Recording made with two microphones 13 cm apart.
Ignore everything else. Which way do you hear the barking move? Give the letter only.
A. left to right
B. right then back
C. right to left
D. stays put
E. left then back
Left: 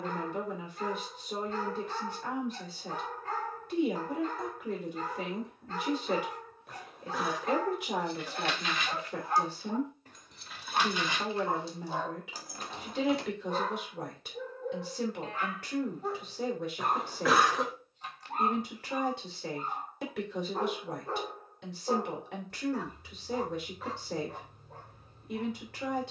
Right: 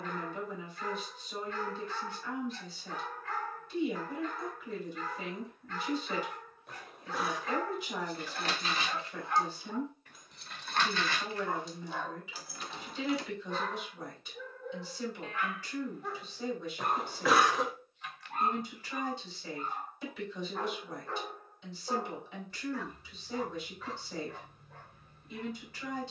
D.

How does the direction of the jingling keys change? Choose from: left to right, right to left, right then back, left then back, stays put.
right to left.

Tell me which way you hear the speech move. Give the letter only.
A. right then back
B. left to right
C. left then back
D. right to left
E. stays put
E.